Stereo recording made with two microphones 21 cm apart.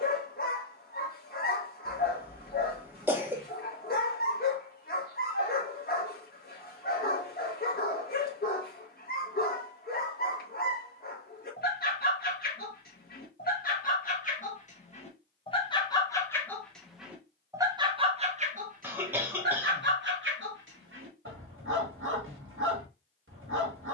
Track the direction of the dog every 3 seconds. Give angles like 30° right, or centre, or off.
40° left, 40° left, 40° left, 40° left, 40° left, 10° left, 50° right, 70° right.